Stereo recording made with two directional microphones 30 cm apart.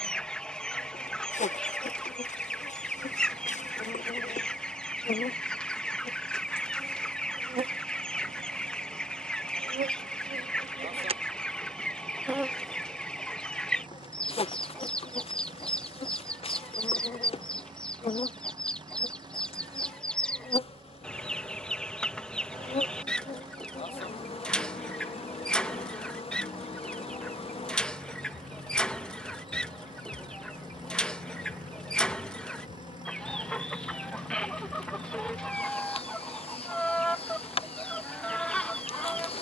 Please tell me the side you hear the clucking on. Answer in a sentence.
You can hear the clucking in the centre.